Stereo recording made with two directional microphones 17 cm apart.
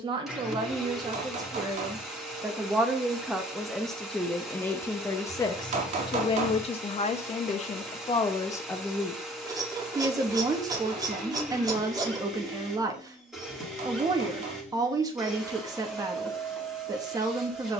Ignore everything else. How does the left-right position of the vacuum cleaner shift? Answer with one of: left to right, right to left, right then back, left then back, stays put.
stays put.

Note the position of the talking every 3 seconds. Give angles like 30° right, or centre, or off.
20° right, 10° left, 30° left, 20° right, 20° right, 20° right.